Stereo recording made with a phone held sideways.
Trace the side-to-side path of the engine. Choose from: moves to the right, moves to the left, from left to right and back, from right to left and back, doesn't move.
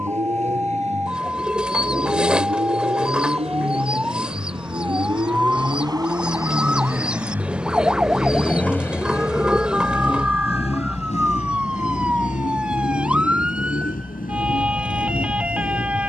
moves to the left.